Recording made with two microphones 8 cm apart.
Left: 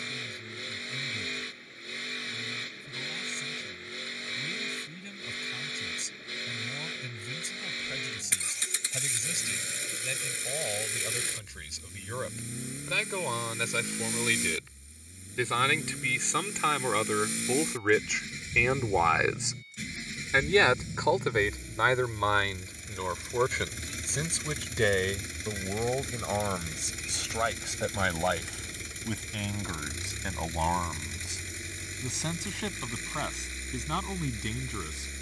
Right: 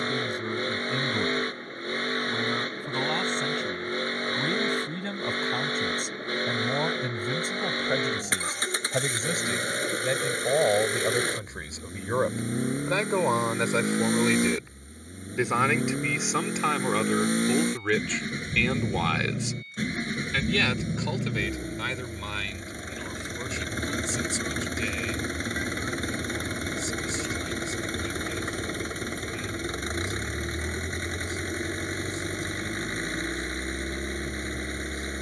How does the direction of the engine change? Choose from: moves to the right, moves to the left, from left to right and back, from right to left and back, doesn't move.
doesn't move.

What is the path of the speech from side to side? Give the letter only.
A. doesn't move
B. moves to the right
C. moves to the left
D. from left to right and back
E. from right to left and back
C.